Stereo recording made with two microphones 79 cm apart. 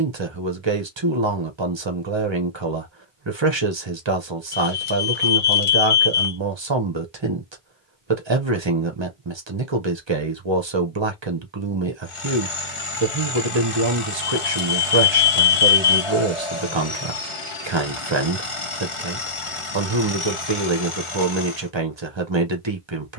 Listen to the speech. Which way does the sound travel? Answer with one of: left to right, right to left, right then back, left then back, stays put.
stays put.